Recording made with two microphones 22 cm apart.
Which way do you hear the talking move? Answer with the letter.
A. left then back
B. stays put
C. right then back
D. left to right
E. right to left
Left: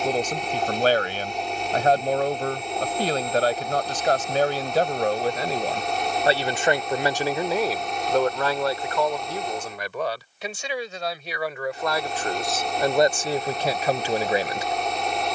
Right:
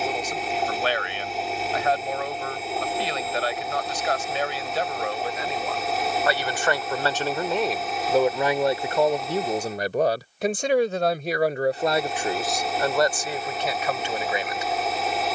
C.